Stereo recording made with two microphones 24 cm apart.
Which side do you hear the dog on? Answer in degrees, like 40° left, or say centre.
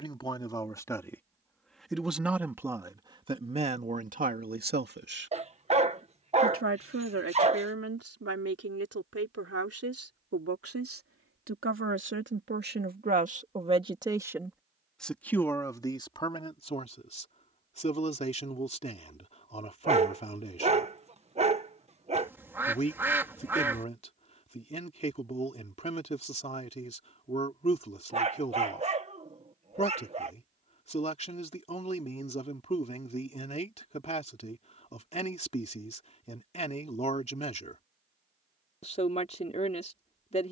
30° right.